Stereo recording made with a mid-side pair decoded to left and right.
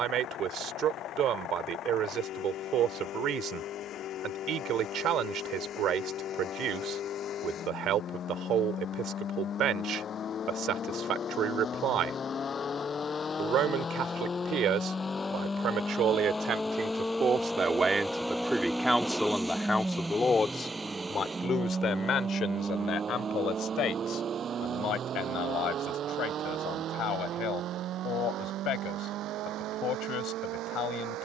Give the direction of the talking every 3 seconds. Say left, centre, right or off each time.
right, right, right, right, right, right, centre, left, left, left, left.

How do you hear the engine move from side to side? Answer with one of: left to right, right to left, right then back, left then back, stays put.
left to right.